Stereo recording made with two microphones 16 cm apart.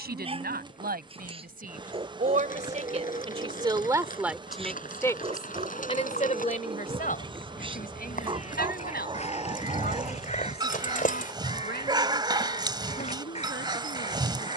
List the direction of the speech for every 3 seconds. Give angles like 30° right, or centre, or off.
60° right, centre, 60° left, 70° left, 80° left.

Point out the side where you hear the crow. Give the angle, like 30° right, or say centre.
40° left.